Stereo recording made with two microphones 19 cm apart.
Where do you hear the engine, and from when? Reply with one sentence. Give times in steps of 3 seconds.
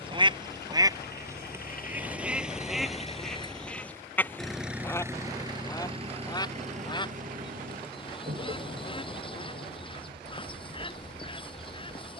In this clip you hear the engine on the left from 0 s, in the centre from 3 s and on the right from 6 s.